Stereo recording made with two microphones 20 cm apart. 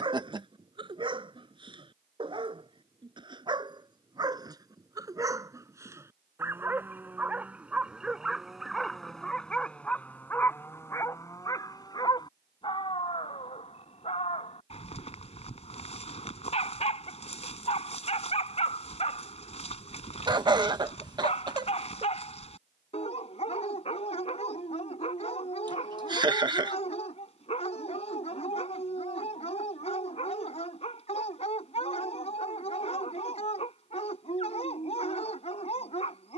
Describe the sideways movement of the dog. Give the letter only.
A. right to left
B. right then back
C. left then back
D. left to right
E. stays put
A.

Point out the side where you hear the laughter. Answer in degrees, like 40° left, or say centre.
20° right.